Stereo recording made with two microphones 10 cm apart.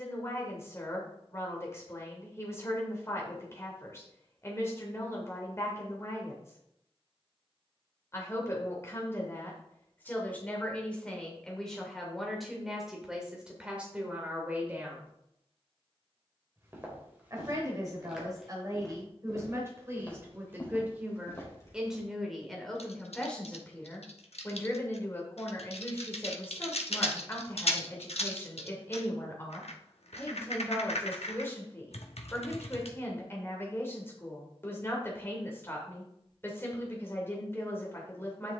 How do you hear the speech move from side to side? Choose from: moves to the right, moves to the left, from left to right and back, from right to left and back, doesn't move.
from left to right and back.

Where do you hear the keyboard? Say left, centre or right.
left.